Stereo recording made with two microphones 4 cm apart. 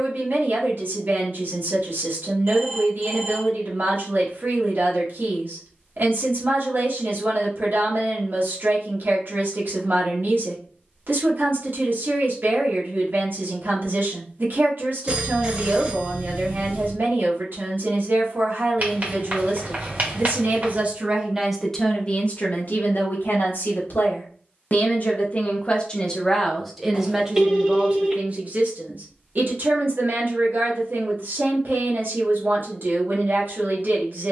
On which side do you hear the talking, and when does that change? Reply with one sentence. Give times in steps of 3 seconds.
In this clip you hear the talking on the right from 0 s, on the left from 21 s and on the right from 27 s.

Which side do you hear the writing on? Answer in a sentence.
You can hear the writing on the right.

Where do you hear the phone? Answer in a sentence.
You can hear the phone on the right.